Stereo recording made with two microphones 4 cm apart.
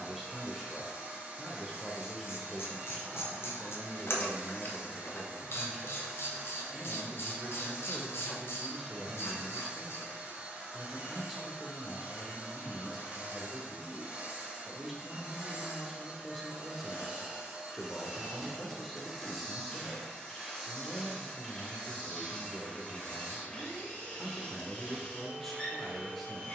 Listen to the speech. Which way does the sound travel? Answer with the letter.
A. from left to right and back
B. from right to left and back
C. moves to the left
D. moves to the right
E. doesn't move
E.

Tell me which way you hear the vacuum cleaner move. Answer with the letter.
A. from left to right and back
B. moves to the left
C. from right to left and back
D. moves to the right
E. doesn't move
B.